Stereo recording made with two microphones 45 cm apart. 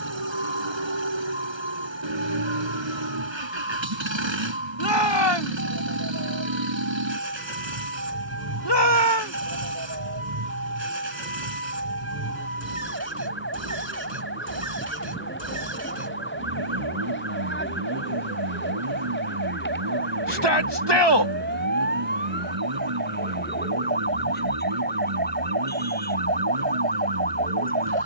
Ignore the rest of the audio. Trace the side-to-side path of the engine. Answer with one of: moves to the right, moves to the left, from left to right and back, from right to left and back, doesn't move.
doesn't move.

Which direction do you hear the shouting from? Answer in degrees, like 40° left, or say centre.
60° left.